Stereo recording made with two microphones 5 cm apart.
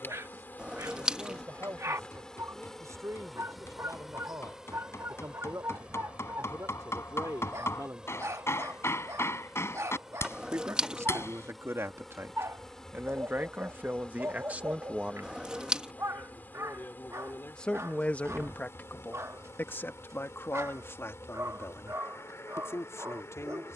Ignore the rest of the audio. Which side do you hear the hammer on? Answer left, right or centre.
left.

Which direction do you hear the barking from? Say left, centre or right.
right.